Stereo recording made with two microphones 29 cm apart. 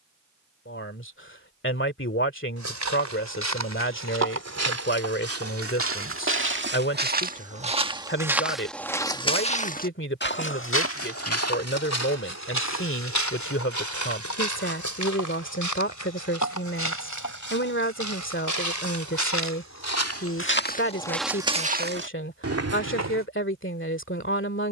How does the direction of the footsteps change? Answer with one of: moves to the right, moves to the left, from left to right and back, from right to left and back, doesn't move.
from right to left and back.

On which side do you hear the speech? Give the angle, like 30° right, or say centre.
40° left.